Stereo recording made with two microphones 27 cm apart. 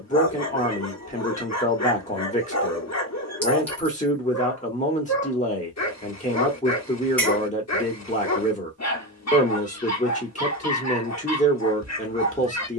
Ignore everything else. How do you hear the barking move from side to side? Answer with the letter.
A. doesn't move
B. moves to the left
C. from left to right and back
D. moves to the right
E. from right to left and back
A.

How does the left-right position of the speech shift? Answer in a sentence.
You can hear the speech stay in one place.